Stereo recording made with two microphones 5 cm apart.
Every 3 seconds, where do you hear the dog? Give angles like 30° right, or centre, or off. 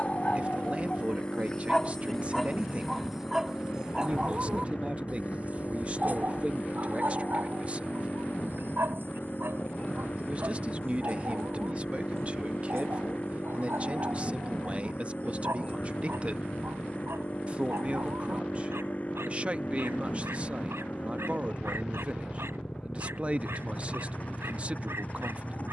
20° left, 20° right, 50° right, 70° right, 80° right, 80° right, 80° right, 80° right, 80° right.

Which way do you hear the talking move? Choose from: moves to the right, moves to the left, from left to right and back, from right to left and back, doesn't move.
doesn't move.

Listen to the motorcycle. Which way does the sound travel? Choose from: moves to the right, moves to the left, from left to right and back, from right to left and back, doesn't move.
doesn't move.